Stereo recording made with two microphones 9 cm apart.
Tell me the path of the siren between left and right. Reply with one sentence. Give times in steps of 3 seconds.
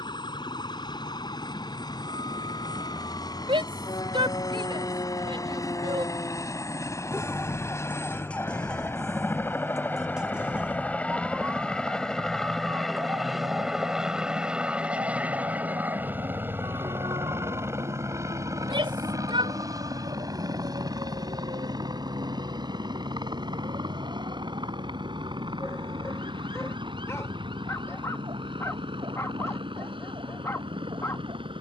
In this clip you hear the siren on the left from 0 s, in the centre from 9 s and on the right from 12 s.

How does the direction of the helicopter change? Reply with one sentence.
In this clip you hear the helicopter move from left to right.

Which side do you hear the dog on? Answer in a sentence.
In this clip you hear the dog on the left.